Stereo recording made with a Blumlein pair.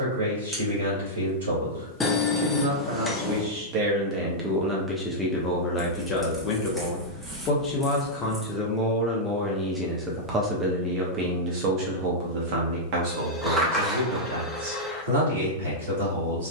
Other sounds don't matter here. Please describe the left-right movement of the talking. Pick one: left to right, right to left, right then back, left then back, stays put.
left then back.